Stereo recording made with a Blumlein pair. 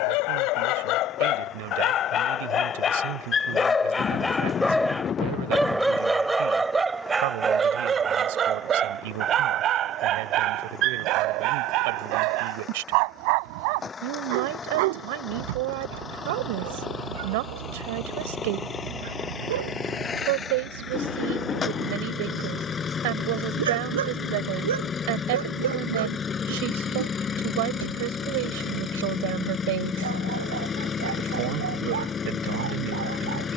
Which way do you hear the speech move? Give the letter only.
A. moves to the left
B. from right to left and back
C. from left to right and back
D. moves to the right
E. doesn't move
E.